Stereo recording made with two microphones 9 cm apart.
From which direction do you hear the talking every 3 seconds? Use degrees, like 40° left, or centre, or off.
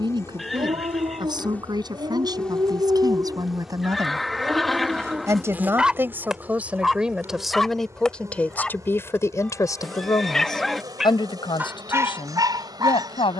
50° right, 40° right, centre, 50° left, 70° left.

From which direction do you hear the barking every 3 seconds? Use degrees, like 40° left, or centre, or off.
50° right, 20° right, centre, centre, 40° right.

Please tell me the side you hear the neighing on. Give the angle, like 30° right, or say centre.
centre.